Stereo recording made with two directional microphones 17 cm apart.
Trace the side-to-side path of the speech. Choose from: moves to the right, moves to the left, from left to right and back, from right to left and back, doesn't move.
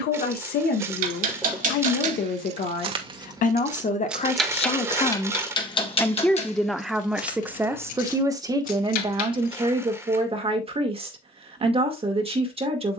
moves to the right.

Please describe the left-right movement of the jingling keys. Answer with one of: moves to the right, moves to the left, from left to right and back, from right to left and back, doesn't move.
moves to the left.